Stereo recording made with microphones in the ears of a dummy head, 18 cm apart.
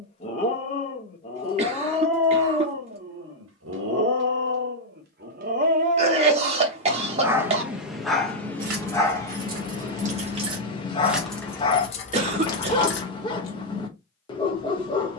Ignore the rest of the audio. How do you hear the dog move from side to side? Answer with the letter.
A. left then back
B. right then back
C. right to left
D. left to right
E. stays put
B.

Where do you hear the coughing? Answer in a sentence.
You can hear the coughing on the right.